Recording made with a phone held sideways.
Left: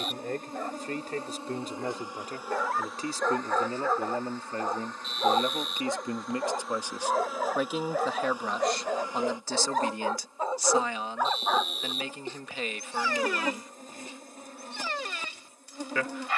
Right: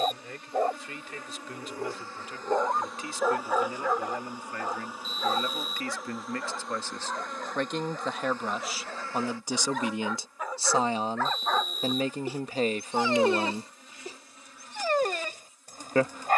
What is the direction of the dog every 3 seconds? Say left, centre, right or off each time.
right, centre, left, left, right, right.